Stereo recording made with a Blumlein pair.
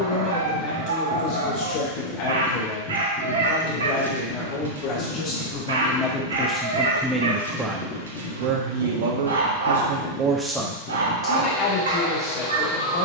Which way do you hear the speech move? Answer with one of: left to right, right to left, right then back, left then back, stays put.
right then back.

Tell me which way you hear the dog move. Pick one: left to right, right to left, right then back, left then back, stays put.
stays put.